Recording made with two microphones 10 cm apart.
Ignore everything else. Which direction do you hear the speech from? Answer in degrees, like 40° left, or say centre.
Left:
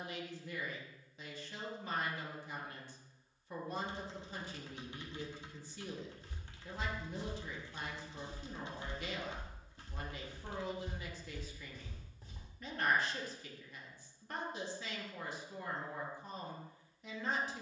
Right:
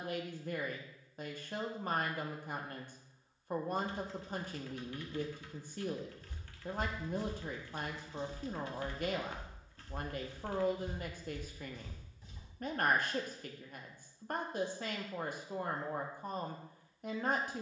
50° right.